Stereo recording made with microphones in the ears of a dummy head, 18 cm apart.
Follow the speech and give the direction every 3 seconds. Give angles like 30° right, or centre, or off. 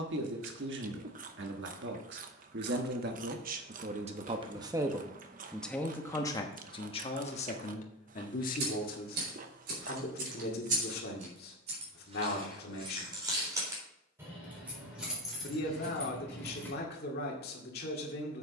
60° right, 20° right, 30° left, 50° left, 50° left, 50° left.